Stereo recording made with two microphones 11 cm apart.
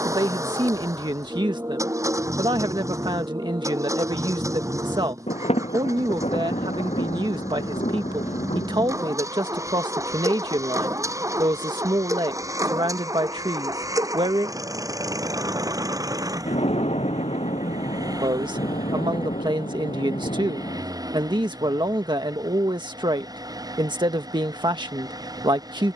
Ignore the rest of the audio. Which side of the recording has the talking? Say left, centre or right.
right.